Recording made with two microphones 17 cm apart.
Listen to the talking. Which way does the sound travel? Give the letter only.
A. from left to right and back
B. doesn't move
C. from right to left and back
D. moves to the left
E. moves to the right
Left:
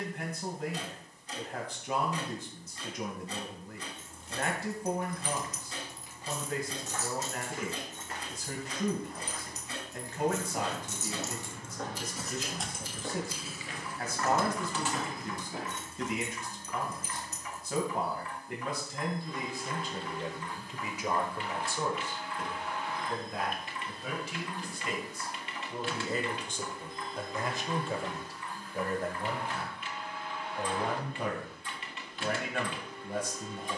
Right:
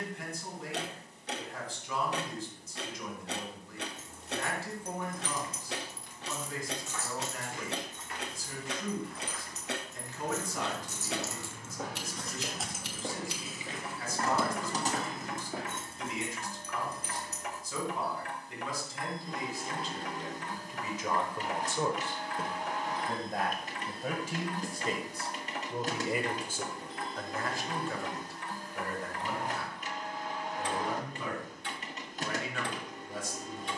A.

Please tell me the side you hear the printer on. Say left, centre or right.
right.